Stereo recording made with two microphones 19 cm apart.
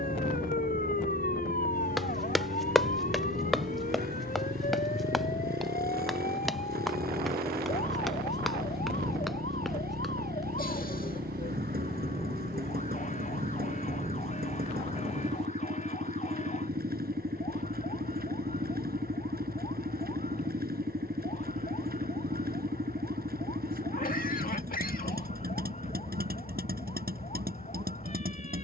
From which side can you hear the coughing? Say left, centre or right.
left.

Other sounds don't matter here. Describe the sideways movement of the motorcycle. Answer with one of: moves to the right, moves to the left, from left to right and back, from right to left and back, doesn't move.
doesn't move.